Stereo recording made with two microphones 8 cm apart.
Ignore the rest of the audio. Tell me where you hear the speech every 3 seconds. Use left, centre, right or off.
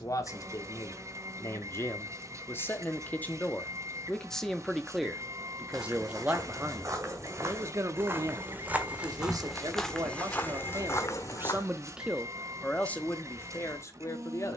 left, centre, right, right, left.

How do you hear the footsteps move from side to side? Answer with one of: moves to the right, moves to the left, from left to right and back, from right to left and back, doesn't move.
moves to the left.